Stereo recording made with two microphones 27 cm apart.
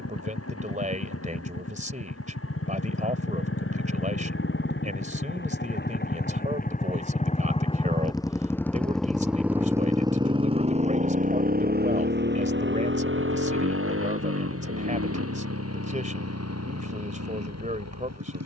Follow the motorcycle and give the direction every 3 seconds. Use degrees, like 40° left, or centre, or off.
60° left, 50° left, 20° left, 20° right, 50° right, 60° right.